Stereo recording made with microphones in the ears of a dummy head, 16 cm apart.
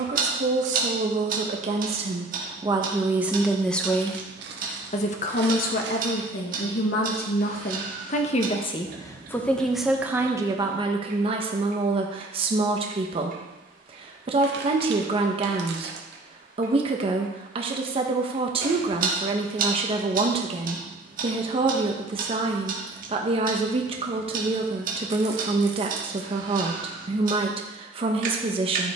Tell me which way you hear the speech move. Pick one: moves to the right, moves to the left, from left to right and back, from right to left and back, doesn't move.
from right to left and back.